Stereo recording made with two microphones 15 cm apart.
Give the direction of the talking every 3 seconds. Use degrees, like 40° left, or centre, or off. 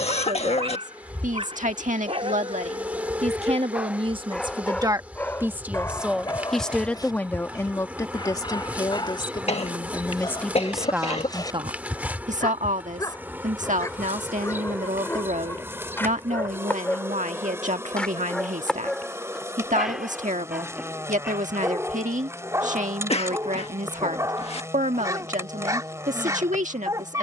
60° right, 30° right, 20° left, 10° left, 60° right, 60° right, 60° right, 60° right, 60° right.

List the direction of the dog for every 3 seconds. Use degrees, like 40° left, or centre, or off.
40° right, centre, 30° left, 30° left, 20° left, 10° left, centre, 20° right, 20° right.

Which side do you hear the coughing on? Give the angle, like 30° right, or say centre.
40° left.